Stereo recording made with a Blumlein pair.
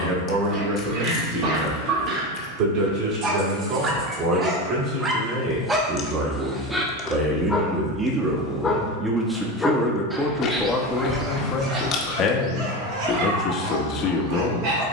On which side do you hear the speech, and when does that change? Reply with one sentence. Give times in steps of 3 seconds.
In this clip you hear the speech on the right from 0 s, in the centre from 9 s and on the left from 12 s.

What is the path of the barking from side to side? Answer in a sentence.
In this clip you hear the barking move from right to left and back again.